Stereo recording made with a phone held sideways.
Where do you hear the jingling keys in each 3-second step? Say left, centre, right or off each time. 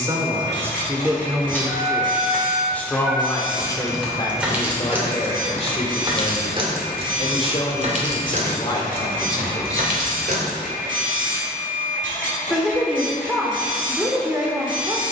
centre, centre, right, right, off.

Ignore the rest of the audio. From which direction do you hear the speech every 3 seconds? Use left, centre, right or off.
centre, left, left, left, centre.